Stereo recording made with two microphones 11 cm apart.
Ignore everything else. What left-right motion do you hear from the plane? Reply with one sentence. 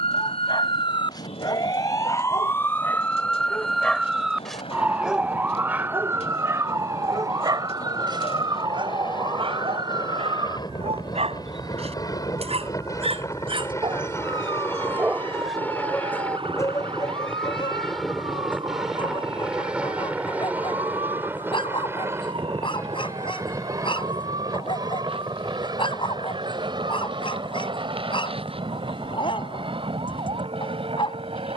You can hear the plane go from the left side to the right.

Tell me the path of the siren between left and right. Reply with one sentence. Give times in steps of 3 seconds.
You can hear the siren on the left from 0 s, in the centre from 3 s and on the right from 6 s.